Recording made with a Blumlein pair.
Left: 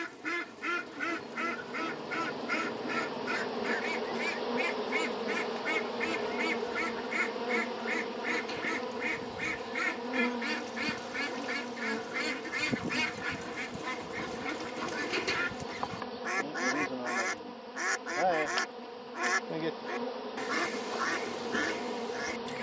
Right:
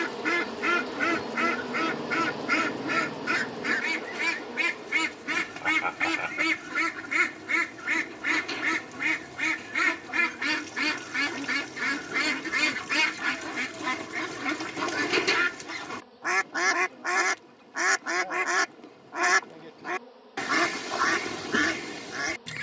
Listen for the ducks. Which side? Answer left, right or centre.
right.